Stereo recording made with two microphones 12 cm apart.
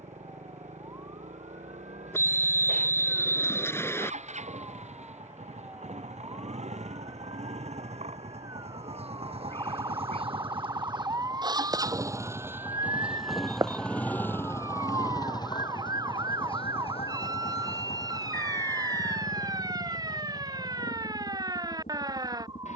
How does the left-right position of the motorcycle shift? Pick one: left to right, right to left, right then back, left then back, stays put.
right to left.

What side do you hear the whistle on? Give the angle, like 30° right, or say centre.
20° left.